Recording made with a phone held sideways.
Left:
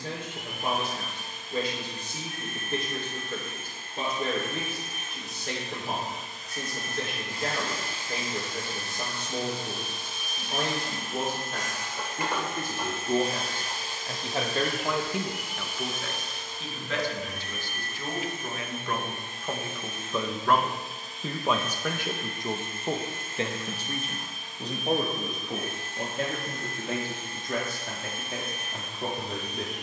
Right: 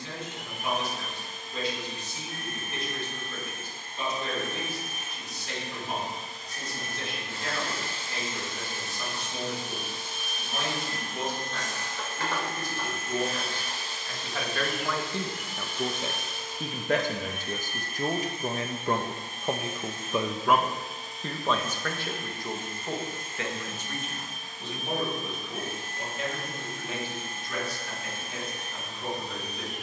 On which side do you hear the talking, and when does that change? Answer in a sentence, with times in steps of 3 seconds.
In this clip you hear the talking on the left from 0 s, on the right from 15 s and on the left from 21 s.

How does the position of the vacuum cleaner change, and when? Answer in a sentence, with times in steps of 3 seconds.
In this clip you hear the vacuum cleaner on the right from 0 s, in the centre from 9 s, on the left from 12 s, in the centre from 15 s and on the right from 18 s.